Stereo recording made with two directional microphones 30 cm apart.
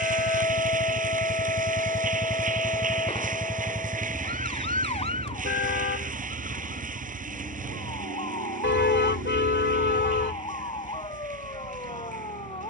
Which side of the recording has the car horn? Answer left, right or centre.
left.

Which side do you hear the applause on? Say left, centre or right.
right.